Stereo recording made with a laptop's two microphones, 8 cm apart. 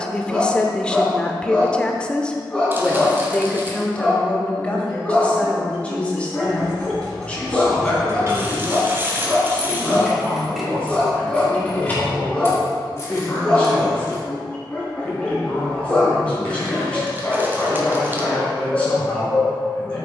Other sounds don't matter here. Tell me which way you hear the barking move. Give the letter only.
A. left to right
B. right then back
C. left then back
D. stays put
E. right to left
D.